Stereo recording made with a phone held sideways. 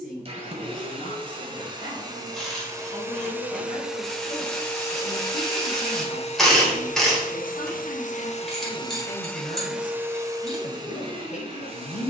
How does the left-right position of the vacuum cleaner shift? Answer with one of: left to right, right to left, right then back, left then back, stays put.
left then back.